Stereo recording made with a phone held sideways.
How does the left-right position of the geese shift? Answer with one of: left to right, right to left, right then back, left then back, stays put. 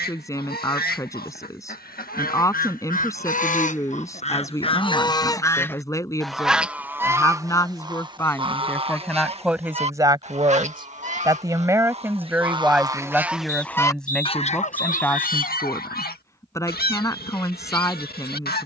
right then back.